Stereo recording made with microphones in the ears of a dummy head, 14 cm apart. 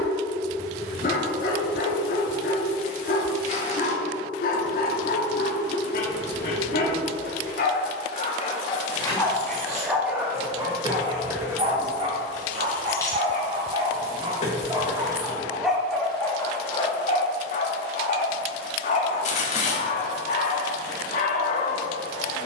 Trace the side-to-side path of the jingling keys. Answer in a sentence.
You can hear the jingling keys move from right to left.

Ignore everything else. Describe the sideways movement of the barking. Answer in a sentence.
In this clip you hear the barking move from left to right and back again.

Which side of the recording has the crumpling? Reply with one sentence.
In this clip you hear the crumpling on the left.